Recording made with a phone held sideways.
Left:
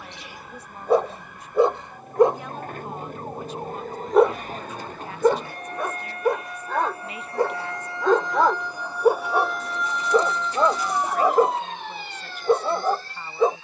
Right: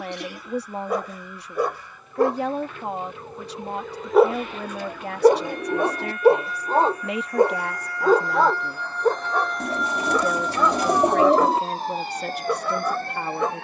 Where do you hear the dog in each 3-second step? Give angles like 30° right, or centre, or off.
30° left, centre, 20° right, 30° left, 30° left.